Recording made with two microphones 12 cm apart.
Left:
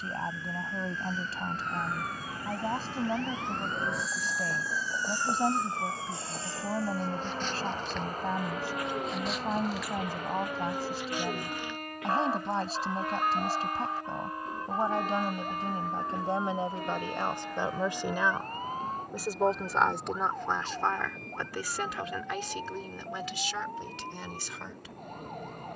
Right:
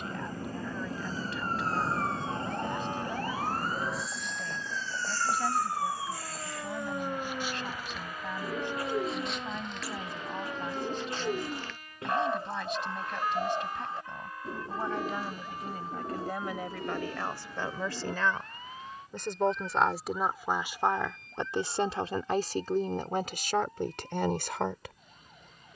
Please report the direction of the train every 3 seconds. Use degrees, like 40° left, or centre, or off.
40° right, 10° left, 40° left, 50° left, 60° left, 60° left, 70° left, 70° left, 70° left.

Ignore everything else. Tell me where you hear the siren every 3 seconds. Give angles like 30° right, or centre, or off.
40° right, 30° right, 10° right, 10° left, 20° left, 40° left, 40° left, 50° left, 50° left.